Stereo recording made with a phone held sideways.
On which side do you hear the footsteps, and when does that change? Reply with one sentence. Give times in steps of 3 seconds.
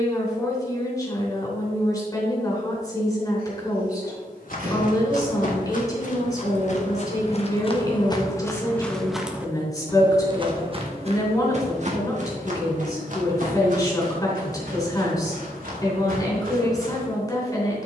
You can hear the footsteps not at all from 0 s, on the left from 3 s and on the right from 9 s.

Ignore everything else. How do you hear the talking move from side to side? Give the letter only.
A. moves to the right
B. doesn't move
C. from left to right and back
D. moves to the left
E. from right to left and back
B.